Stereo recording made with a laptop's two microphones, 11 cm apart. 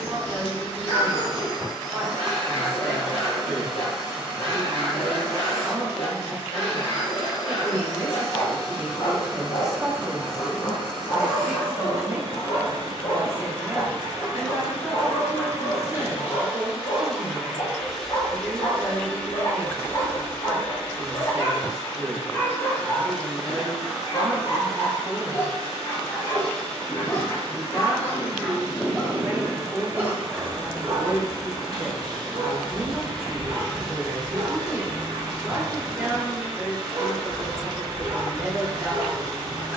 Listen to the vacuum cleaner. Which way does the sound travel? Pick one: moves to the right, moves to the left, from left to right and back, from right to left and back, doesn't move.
from right to left and back.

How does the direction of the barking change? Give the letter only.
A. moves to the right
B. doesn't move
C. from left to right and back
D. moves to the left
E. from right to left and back
A.